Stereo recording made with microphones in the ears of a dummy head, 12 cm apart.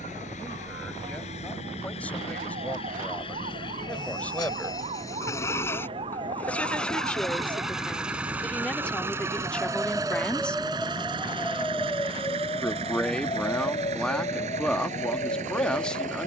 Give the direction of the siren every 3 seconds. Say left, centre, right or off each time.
right, right, right, centre, left, left.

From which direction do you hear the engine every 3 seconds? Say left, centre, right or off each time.
left, left, centre, right, right, right.